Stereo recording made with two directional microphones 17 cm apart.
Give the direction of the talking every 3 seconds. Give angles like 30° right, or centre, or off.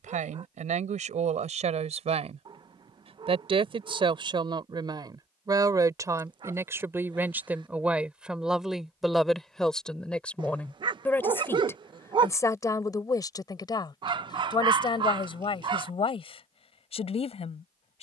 40° right, 30° right, 10° right, 10° left, 20° left, 30° left.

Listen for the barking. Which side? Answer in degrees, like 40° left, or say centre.
30° right.